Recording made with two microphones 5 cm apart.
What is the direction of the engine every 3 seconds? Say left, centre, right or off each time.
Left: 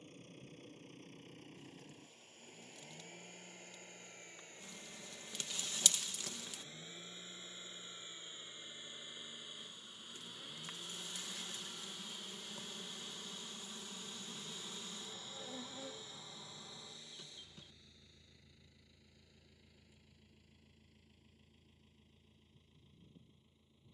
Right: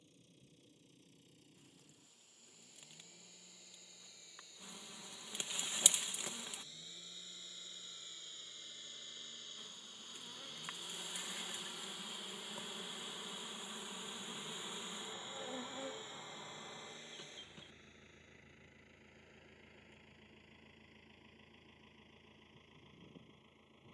left, left, left, centre, centre, right, right, right.